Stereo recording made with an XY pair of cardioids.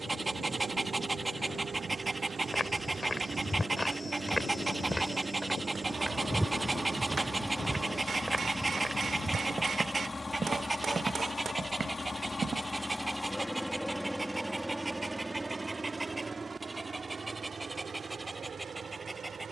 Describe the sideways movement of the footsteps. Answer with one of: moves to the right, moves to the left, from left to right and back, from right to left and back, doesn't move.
moves to the right.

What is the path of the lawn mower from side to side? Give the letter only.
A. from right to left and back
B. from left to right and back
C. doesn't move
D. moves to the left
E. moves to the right
A.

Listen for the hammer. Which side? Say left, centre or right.
right.